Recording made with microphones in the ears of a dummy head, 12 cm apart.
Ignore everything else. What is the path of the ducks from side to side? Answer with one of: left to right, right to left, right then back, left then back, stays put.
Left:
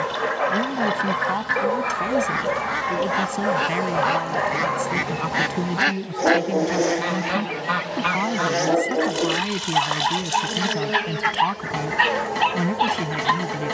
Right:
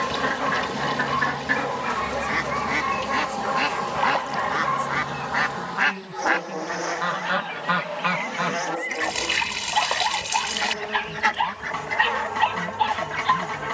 left then back.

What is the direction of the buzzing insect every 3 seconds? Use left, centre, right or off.
right, centre, left, left, left.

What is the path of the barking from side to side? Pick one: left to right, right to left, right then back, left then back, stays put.
stays put.